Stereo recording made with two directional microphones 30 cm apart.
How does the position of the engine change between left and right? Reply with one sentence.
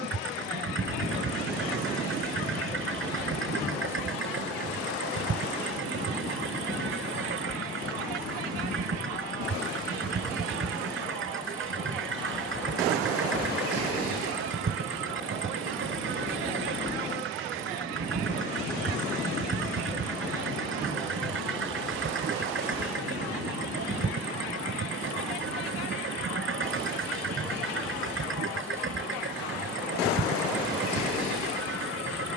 You can hear the engine stay put.